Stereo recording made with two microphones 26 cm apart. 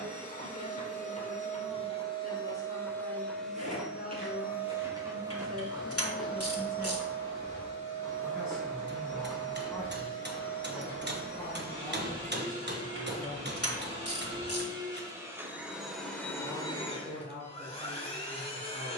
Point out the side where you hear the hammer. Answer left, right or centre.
right.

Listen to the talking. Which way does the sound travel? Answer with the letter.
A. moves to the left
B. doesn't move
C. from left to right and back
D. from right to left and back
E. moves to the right
D.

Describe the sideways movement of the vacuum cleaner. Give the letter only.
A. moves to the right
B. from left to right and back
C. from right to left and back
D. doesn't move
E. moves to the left
B.